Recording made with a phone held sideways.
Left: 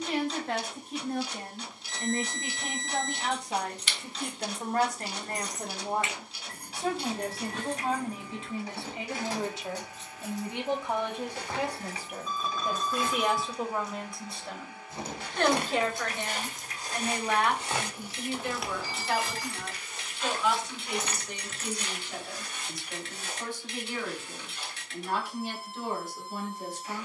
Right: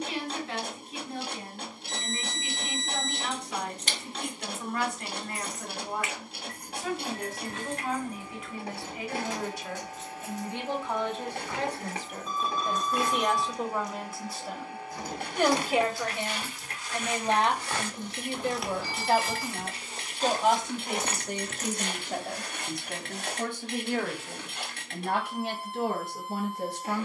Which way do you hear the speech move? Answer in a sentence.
In this clip you hear the speech travel towards the right.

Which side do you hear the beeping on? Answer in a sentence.
In this clip you hear the beeping on the right.